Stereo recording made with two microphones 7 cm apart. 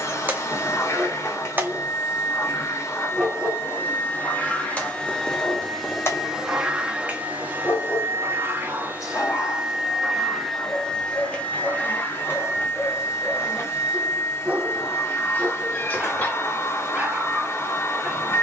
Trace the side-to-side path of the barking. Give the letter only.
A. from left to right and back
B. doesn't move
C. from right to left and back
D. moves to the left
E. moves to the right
C.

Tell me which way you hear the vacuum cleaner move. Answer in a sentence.
You can hear the vacuum cleaner move from left to right and back again.